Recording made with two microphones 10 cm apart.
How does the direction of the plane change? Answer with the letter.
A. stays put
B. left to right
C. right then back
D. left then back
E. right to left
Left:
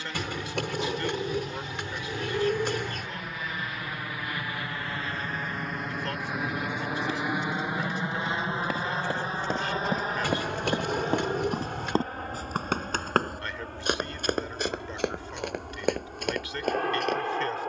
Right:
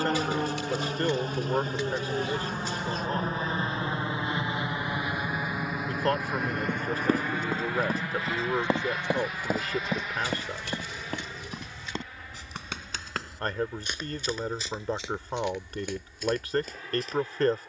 E.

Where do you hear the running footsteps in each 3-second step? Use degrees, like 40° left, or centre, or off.
off, off, 40° right, 10° left, 60° left, 70° left.